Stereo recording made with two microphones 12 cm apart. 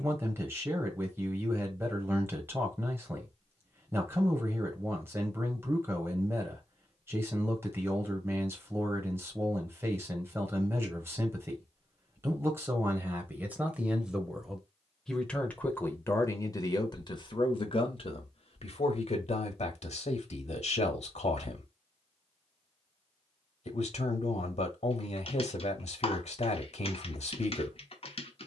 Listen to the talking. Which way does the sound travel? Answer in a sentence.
You can hear the talking go from the right side to the left.